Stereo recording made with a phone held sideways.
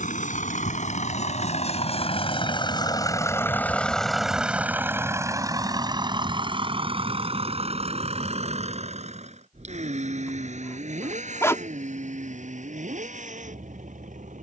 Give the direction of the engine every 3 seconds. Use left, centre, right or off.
left, centre, right, right, right.